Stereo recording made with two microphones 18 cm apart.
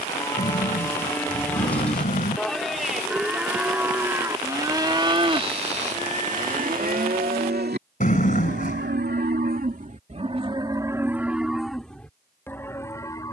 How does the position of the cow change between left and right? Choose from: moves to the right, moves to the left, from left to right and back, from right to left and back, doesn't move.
from left to right and back.